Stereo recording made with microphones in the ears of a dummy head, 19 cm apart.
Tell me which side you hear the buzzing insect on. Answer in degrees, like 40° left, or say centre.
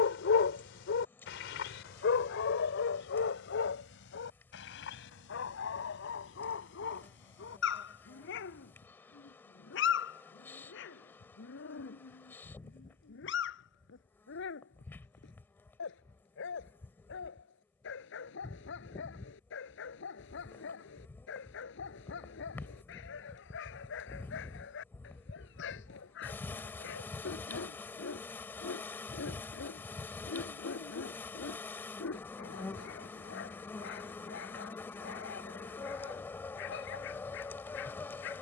10° left.